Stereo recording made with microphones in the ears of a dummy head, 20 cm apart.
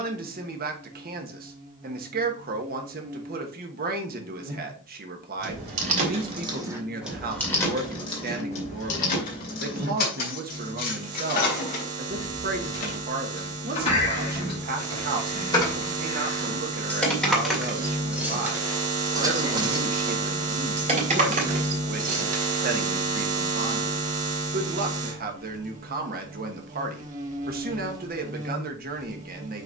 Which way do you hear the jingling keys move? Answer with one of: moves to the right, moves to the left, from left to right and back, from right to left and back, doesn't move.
from right to left and back.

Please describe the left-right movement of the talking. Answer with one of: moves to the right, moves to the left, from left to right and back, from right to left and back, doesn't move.
doesn't move.